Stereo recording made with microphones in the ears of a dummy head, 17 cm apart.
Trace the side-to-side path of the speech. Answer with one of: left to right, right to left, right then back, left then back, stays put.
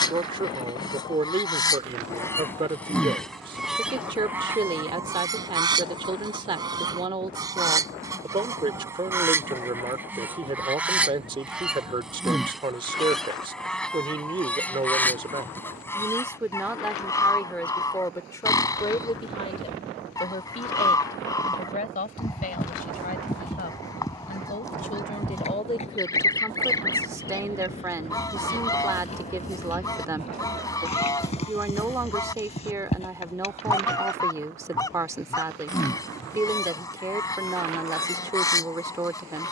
left then back.